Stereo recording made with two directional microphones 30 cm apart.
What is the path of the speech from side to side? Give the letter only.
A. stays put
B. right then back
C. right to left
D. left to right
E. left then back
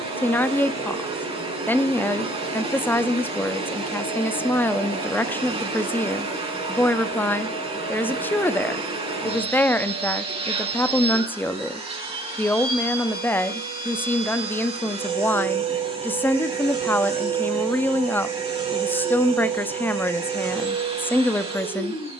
A.